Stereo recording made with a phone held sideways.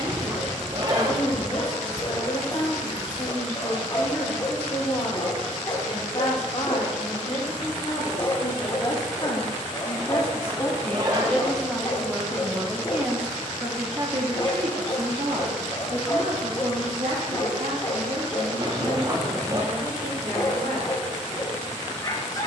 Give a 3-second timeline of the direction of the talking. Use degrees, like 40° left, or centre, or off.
50° left, 50° left, 40° left, 20° left, 30° right, 60° right, 70° right, off.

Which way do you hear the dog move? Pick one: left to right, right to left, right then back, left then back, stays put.
stays put.